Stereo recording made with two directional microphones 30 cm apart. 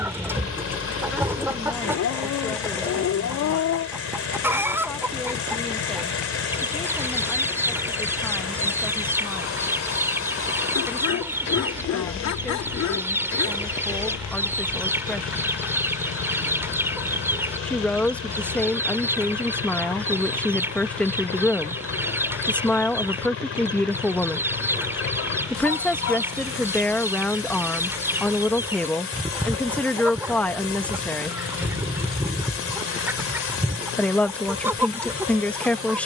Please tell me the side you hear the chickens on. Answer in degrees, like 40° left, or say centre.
10° right.